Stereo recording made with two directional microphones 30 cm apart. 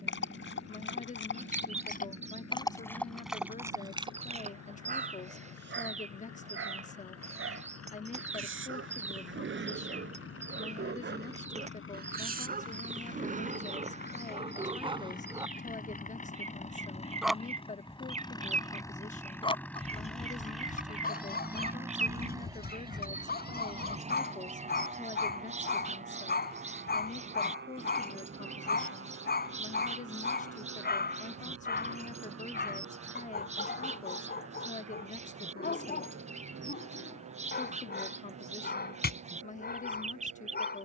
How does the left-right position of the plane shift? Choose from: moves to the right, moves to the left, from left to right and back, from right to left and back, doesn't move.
moves to the right.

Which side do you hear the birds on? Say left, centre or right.
right.